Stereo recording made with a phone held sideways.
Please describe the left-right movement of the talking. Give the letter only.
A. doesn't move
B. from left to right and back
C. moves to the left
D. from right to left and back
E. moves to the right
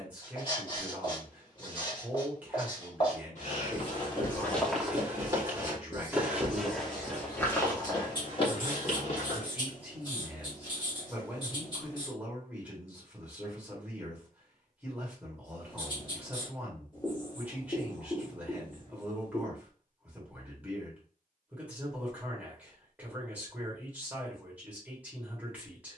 A.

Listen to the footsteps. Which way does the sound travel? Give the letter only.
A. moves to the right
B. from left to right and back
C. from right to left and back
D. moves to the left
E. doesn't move
B.